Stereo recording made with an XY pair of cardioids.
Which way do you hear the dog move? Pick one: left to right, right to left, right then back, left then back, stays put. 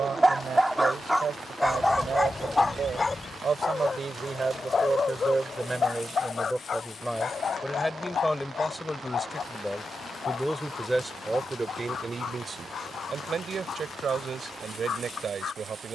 right to left.